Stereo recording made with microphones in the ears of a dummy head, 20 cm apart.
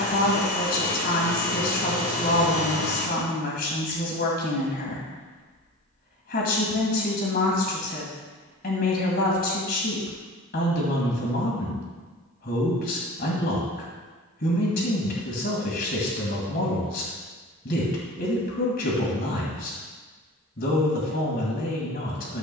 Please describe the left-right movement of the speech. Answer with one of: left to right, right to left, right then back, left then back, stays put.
stays put.